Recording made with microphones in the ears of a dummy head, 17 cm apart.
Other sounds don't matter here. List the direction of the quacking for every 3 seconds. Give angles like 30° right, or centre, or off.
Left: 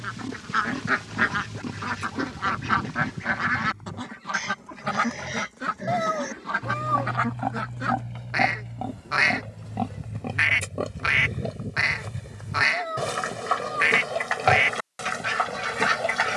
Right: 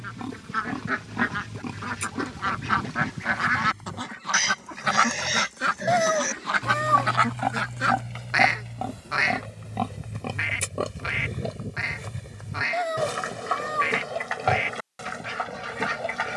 10° left, 30° right, 50° right, 20° left, 30° left, 30° left.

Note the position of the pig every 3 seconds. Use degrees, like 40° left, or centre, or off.
70° right, 70° right, 50° right, 30° right, 10° left, 20° left.